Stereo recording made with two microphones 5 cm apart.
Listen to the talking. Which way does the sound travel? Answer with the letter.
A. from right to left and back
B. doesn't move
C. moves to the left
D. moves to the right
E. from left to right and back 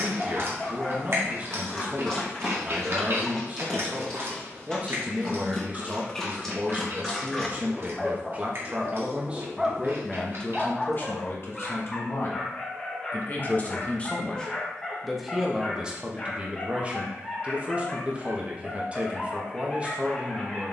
A.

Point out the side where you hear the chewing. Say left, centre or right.
right.